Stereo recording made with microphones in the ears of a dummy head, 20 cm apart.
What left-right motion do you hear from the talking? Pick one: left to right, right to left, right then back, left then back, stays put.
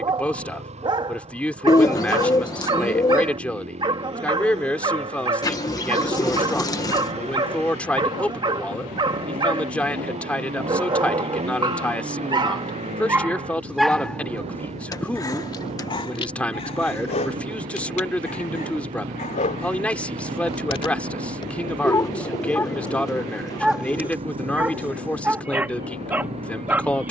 stays put.